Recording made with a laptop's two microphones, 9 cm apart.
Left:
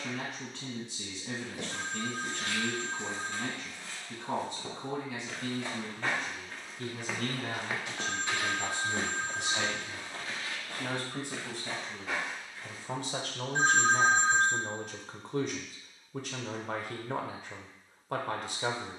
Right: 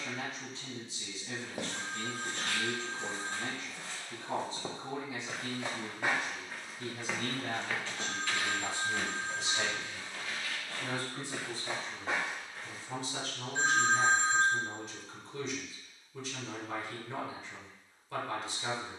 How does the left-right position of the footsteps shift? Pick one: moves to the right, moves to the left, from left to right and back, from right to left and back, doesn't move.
from right to left and back.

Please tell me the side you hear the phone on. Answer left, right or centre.
left.